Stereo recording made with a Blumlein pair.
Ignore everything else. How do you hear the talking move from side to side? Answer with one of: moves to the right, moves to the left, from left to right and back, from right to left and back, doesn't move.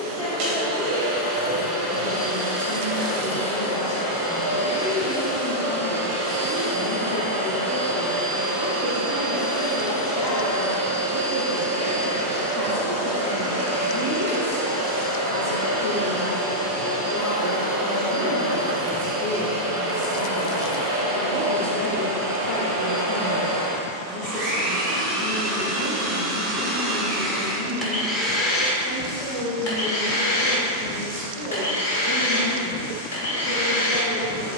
doesn't move.